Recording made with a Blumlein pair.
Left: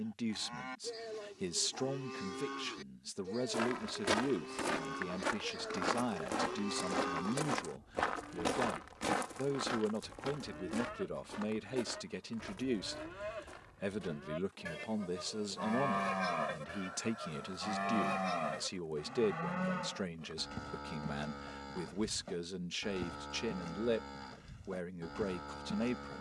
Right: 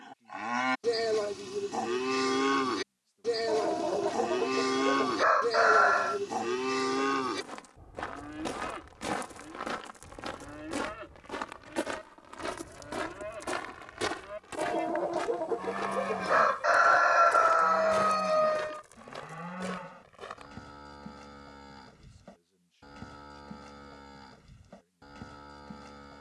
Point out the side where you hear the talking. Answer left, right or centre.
left.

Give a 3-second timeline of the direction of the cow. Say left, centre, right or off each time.
right, right, right, centre, centre, centre, centre, centre, centre.